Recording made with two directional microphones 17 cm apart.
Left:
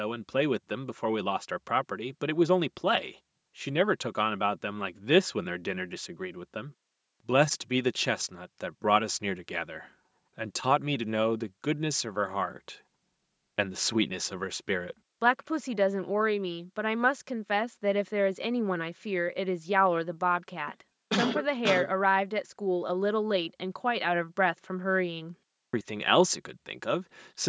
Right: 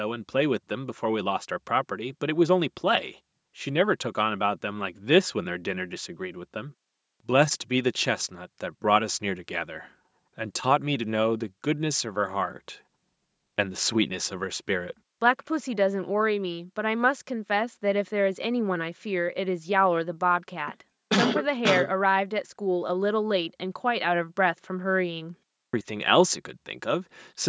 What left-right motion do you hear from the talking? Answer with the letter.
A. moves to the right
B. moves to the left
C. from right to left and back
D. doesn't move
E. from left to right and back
D.